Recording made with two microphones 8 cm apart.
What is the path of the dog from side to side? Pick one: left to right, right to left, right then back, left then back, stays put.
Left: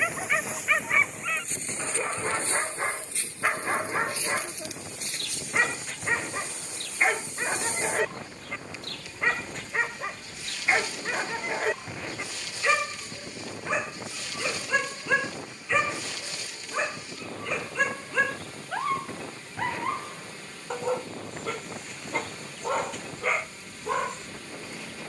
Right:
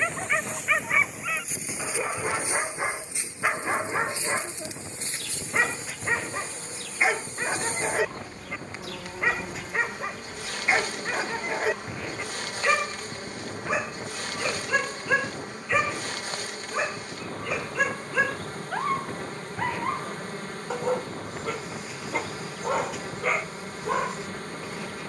stays put.